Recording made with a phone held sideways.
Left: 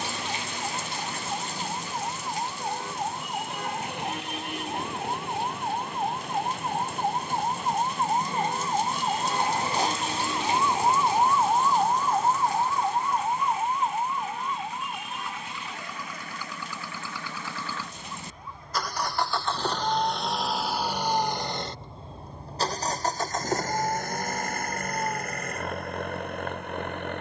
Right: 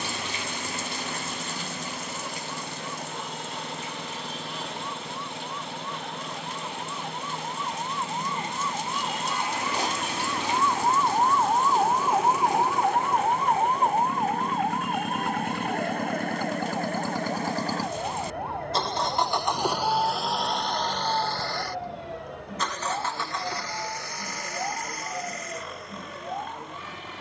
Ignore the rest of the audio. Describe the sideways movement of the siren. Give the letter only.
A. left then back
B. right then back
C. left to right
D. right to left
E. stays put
C.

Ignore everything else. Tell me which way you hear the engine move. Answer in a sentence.
You can hear the engine move to the left.